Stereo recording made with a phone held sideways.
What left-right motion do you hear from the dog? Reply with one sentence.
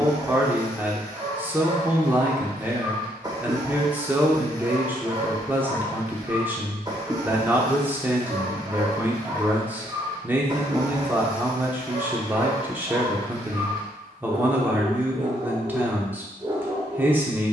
You can hear the dog stay put.